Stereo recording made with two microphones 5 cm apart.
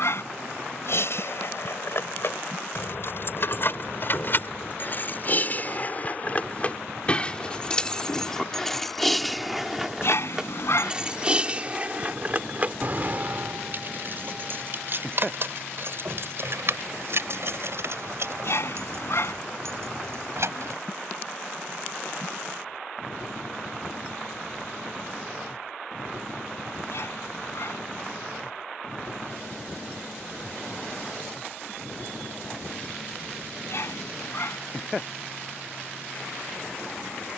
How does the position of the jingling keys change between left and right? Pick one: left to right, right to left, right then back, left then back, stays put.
left to right.